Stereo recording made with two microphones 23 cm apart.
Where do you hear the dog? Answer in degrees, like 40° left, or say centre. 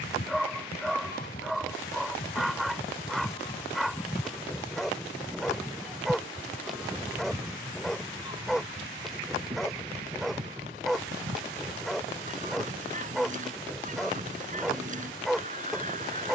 centre.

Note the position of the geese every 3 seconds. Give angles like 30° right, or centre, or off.
40° left, 10° left, 10° right, 30° right, 30° right, 30° right.